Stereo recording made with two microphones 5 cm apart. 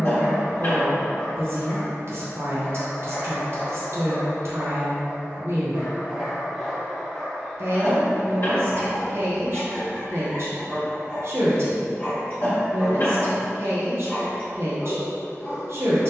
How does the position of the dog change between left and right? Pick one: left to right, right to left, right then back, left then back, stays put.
right then back.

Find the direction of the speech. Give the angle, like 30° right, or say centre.
50° right.